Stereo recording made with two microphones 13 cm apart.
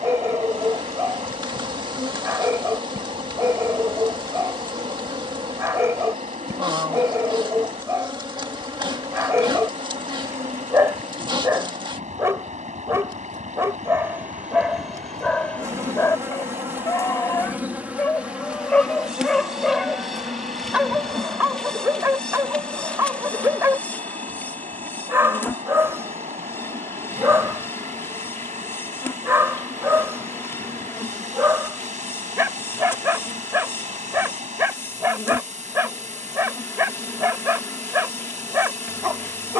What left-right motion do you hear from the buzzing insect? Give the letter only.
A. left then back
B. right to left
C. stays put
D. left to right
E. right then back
B.